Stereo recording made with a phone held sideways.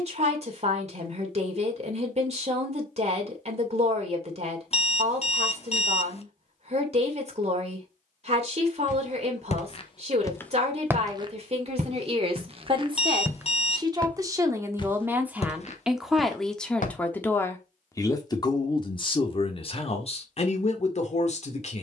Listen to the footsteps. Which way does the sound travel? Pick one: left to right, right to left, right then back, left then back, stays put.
right then back.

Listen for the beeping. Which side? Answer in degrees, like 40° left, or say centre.
40° left.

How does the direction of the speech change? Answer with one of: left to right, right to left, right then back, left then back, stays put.
right to left.